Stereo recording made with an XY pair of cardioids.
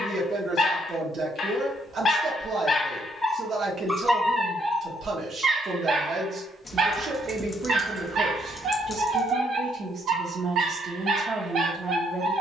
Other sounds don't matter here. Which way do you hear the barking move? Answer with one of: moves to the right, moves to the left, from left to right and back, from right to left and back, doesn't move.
moves to the right.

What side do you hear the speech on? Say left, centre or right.
right.